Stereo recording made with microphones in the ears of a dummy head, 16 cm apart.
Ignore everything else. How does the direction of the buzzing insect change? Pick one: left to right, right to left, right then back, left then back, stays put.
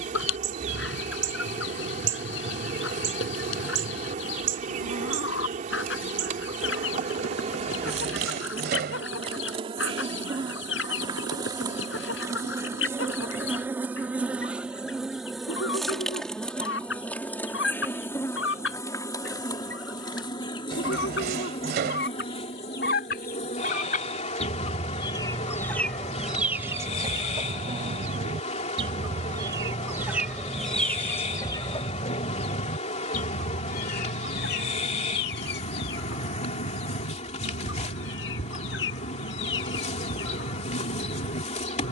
right to left.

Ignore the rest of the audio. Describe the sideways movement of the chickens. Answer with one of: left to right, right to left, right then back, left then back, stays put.
right then back.